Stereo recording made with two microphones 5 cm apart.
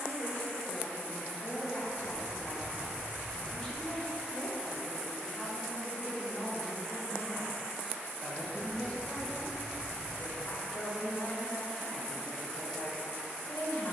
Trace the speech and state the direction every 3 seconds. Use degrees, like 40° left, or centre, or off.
40° left, centre, 10° left, 40° left, 50° left.